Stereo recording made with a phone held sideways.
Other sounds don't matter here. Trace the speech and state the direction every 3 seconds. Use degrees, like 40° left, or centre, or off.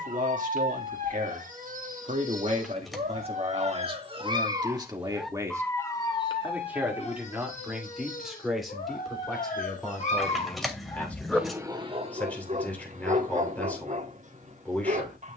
50° right, 30° right, centre, 10° left, 10° left.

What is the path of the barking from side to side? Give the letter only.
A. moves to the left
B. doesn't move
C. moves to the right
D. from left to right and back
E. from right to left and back
E.